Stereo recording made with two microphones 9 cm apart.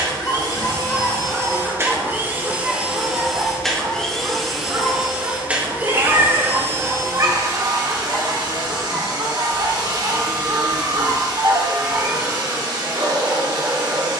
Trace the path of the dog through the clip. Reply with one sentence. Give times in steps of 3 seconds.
In this clip you hear the dog in the centre from 0 s and on the right from 3 s.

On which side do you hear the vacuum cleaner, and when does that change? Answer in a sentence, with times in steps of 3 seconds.
You can hear the vacuum cleaner on the right from 0 s, in the centre from 3 s and on the right from 6 s.